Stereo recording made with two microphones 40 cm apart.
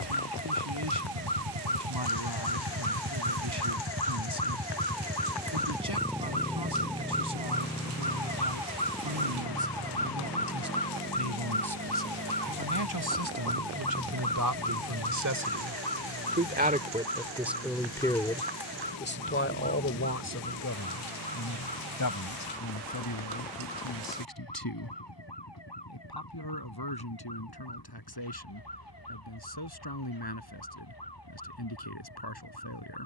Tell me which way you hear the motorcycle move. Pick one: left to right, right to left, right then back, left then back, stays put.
right to left.